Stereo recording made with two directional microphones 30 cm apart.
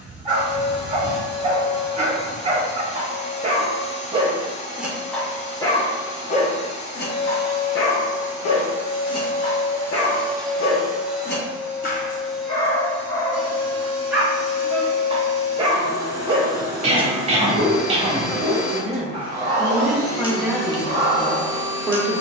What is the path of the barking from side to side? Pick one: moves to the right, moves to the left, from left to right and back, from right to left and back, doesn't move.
from right to left and back.